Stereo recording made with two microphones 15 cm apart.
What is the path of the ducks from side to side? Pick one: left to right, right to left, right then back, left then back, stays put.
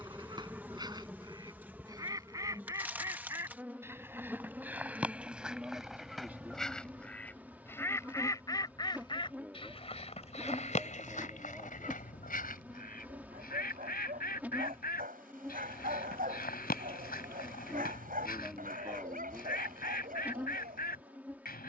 right to left.